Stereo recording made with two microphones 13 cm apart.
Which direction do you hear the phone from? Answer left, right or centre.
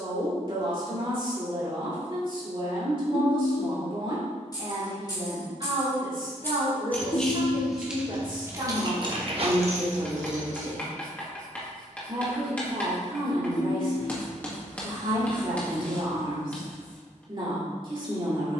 left.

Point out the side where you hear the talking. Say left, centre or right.
right.